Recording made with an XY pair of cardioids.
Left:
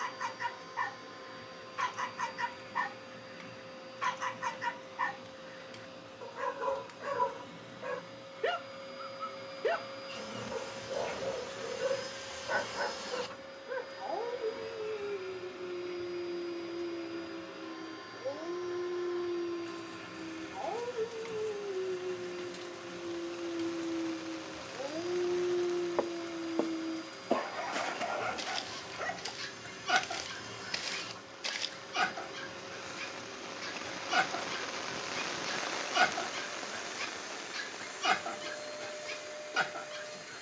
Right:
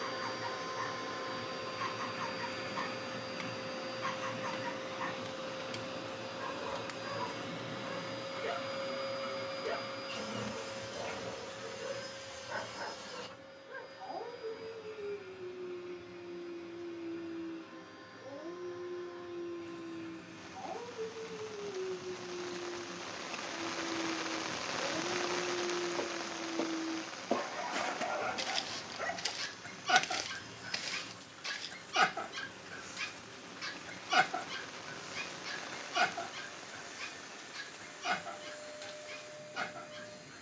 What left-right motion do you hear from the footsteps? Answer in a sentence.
In this clip you hear the footsteps go right and come back.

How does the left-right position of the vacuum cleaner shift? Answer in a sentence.
In this clip you hear the vacuum cleaner go from the right side to the left.